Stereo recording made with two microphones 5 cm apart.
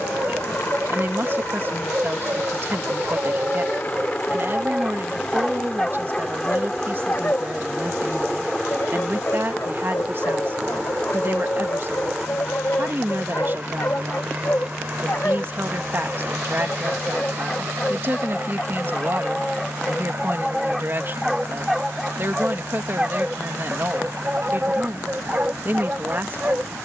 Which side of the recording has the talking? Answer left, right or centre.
right.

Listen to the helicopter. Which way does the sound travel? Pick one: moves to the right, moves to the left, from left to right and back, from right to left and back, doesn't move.
moves to the right.